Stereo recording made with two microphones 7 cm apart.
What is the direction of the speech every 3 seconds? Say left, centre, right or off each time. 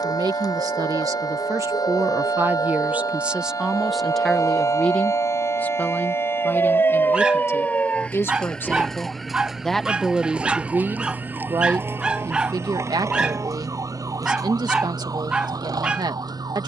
right, centre, left, right, right, right.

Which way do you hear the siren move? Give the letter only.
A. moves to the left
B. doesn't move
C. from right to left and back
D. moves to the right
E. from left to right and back
D.